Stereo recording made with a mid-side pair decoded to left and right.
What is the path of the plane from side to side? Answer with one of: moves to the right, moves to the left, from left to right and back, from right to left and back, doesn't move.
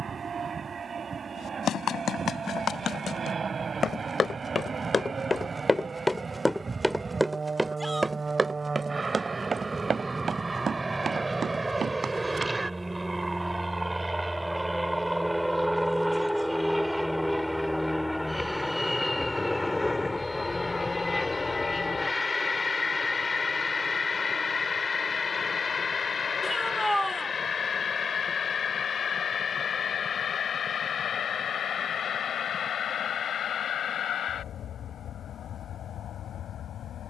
moves to the left.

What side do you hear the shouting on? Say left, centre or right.
centre.